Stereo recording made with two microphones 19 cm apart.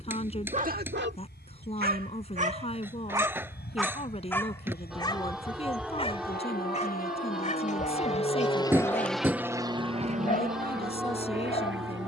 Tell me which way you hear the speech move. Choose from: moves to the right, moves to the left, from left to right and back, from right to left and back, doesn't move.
doesn't move.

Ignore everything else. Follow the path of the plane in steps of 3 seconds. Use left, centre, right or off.
left, left, left, right.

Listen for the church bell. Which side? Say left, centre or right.
centre.